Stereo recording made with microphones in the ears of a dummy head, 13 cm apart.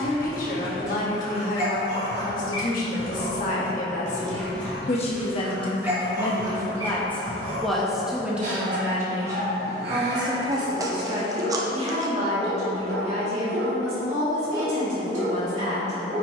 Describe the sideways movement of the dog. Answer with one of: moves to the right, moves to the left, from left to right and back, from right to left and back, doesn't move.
moves to the right.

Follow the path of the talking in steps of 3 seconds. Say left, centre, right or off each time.
left, left, centre, right, right, right.